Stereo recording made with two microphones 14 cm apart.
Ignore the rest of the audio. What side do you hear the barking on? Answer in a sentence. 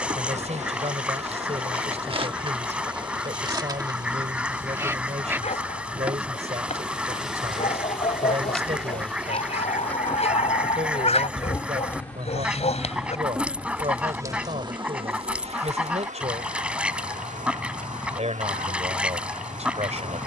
In this clip you hear the barking on the left.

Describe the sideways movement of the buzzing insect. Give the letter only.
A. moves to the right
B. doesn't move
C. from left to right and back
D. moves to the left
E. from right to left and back
E.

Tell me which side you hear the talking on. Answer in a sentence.
In this clip you hear the talking on the right.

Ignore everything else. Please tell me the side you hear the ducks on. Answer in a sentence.
In this clip you hear the ducks in the centre.